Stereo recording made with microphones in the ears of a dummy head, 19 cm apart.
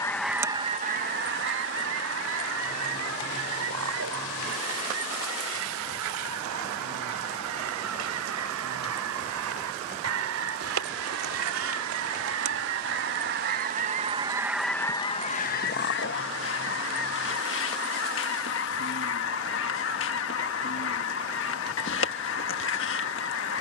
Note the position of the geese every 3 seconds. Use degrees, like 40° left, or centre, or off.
40° right, 80° right, 80° right, 70° right, 40° right, 50° left, 60° left, 60° left.